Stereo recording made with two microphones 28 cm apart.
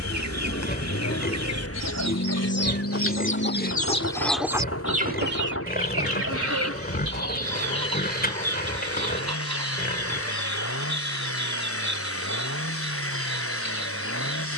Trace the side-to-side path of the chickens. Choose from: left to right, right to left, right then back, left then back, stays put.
left to right.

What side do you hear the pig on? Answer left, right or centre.
left.